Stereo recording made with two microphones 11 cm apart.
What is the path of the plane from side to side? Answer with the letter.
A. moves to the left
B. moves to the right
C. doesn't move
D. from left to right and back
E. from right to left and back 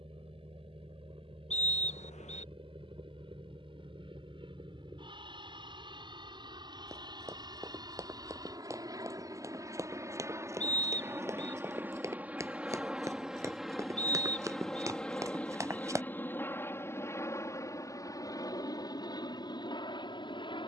A.